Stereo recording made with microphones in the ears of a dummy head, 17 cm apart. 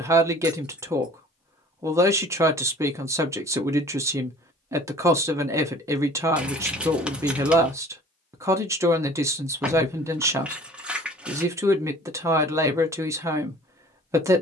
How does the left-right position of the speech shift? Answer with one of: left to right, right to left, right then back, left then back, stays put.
stays put.